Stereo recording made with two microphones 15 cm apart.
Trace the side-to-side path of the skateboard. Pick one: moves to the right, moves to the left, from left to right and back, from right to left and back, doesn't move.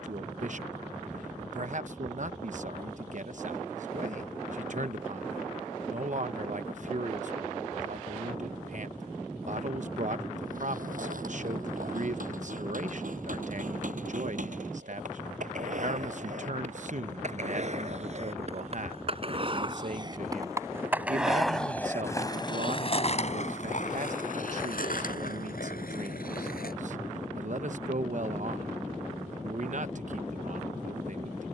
moves to the left.